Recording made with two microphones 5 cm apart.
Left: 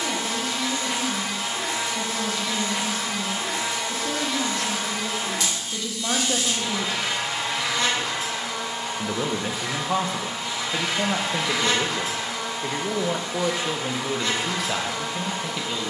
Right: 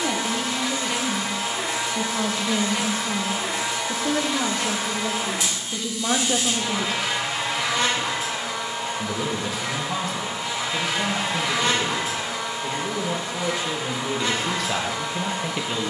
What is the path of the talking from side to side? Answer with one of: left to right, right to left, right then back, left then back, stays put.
left then back.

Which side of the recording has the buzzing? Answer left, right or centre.
centre.